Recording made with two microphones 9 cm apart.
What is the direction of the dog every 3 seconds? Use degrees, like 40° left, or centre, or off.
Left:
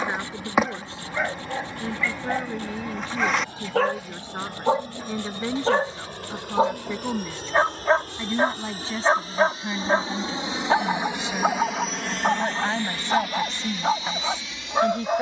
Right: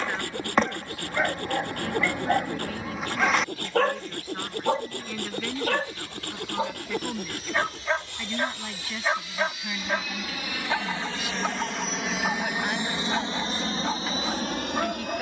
centre, 10° left, 40° left, 40° left, 40° left.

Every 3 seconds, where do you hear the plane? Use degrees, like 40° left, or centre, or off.
70° left, 60° left, 50° left, 20° left, 30° right.